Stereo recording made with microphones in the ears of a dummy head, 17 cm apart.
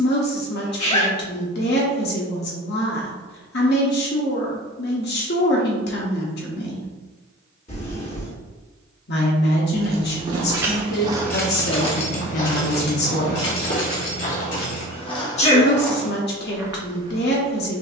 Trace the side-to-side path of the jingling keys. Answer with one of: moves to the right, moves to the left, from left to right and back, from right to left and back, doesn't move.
moves to the left.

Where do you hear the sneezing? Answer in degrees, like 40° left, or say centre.
30° left.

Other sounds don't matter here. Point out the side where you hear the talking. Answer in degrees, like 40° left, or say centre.
60° left.